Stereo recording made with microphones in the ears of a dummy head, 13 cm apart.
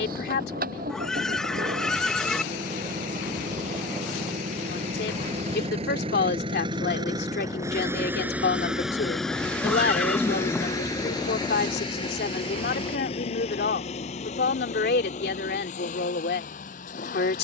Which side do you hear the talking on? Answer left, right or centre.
left.